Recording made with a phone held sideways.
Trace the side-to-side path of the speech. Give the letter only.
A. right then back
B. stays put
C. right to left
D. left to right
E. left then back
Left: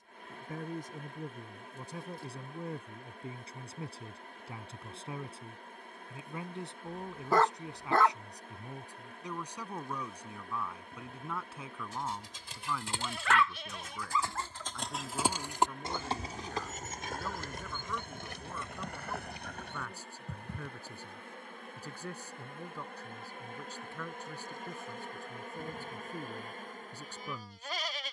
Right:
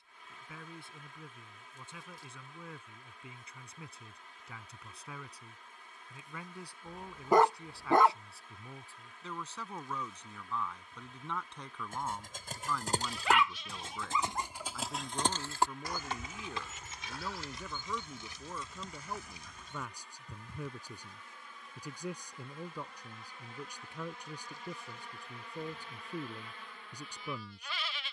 D.